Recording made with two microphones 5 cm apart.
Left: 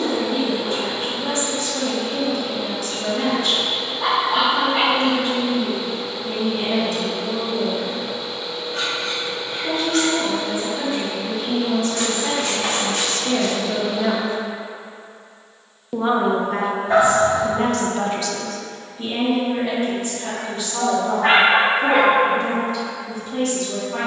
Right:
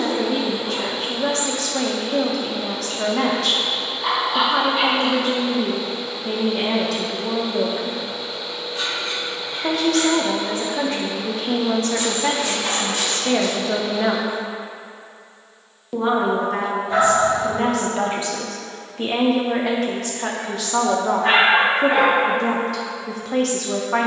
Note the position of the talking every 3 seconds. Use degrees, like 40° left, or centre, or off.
80° right, 80° right, 80° right, 60° right, 30° right, centre, 60° right, 80° right.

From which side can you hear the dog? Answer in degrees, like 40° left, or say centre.
70° left.